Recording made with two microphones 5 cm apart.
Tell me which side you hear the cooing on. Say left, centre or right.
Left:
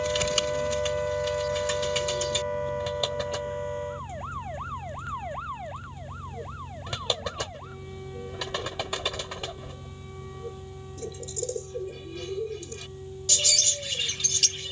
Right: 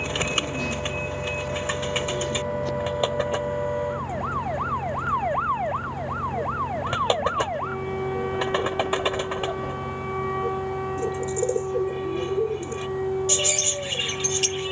right.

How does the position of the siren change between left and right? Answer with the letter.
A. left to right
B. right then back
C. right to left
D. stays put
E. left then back
A.